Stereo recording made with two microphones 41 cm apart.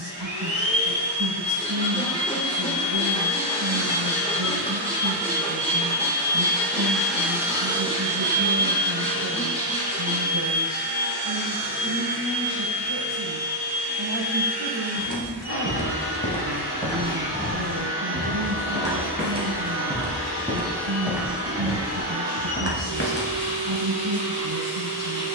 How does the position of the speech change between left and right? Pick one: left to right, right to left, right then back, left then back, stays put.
stays put.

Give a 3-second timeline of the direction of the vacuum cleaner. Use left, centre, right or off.
left, left, centre, right, right, right, right, right, right.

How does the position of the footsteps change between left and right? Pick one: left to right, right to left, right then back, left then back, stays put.
right then back.